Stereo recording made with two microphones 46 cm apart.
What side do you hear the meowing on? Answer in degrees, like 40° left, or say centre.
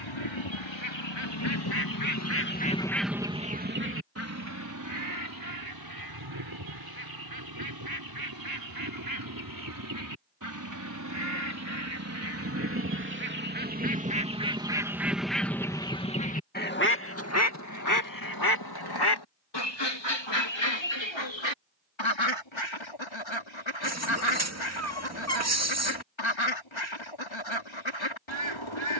30° right.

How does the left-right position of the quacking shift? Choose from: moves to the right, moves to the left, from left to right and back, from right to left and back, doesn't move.
from left to right and back.